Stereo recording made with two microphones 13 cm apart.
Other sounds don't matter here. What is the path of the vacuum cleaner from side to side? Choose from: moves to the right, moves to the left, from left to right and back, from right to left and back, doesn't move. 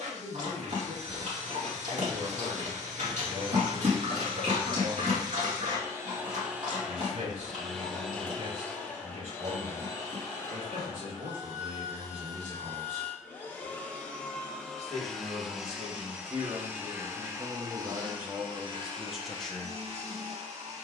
from right to left and back.